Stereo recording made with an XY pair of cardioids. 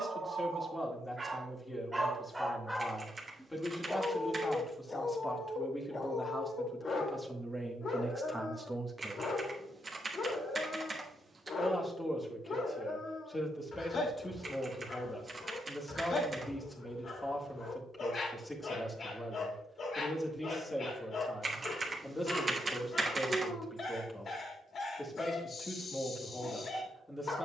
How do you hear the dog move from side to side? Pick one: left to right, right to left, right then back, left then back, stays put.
right to left.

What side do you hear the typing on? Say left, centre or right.
right.